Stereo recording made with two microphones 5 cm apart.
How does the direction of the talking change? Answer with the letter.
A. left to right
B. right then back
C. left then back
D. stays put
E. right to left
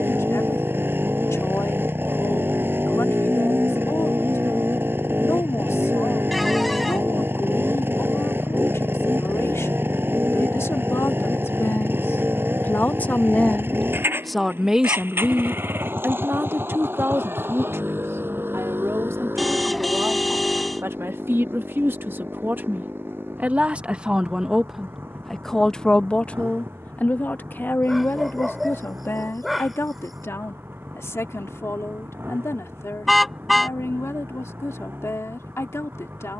B.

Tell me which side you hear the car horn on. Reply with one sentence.
You can hear the car horn in the centre.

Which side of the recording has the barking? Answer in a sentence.
You can hear the barking in the centre.